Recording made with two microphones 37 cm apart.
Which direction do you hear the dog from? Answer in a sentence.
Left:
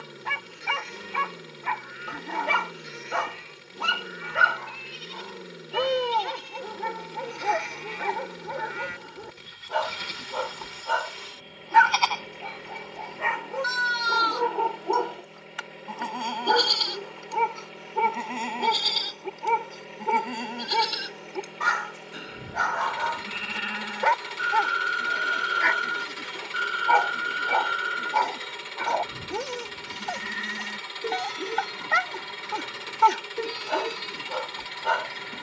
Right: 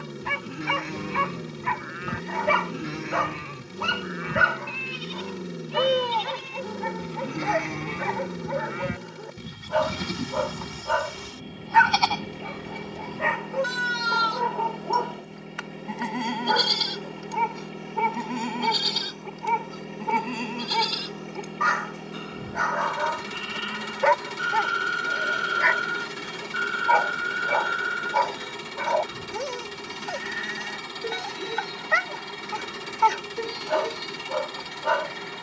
You can hear the dog on the left.